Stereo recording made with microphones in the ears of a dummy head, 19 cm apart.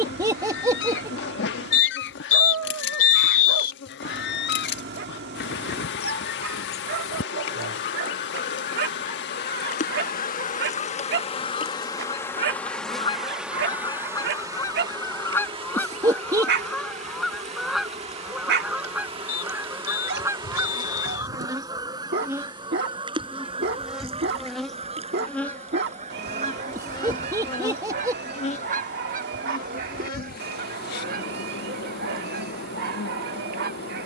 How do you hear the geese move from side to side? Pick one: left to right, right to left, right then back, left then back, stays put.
left to right.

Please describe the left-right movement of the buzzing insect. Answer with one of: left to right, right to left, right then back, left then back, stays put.
right then back.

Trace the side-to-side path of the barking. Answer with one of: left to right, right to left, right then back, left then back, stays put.
stays put.